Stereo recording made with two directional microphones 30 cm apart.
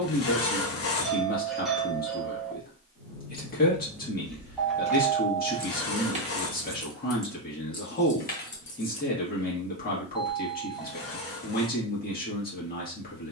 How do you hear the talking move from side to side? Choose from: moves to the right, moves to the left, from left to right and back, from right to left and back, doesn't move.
doesn't move.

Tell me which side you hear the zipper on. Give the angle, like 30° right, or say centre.
50° left.